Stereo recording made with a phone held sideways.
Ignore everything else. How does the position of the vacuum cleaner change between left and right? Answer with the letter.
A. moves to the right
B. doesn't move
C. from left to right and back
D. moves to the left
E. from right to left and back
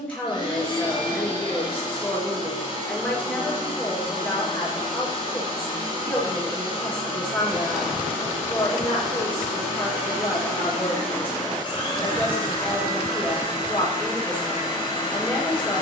B.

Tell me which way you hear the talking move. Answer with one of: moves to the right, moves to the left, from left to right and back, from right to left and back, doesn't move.
doesn't move.